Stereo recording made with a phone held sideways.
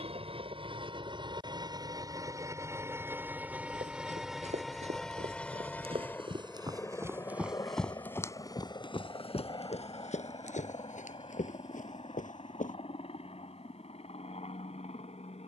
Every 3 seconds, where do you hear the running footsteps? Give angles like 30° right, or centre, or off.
off, 60° right, centre, 60° left, 80° left.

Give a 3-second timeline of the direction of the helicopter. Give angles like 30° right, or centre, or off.
30° right, centre, 20° left, 40° left, 50° left.